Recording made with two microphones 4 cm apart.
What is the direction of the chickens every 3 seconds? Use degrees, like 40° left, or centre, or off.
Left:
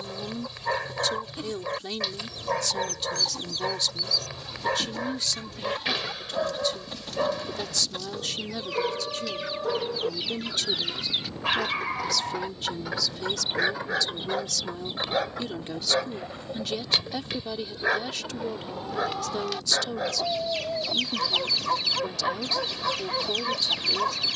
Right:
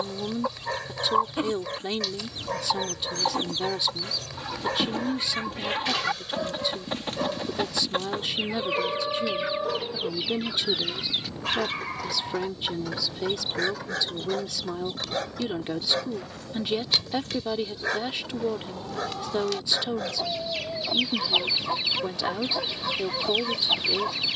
40° right, 40° right, 40° right, centre, 20° left, 20° left, 10° left, 20° right.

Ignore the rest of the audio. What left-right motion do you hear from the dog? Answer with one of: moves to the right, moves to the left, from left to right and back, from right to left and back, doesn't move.
doesn't move.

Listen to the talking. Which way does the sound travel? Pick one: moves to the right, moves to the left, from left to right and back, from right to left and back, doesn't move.
doesn't move.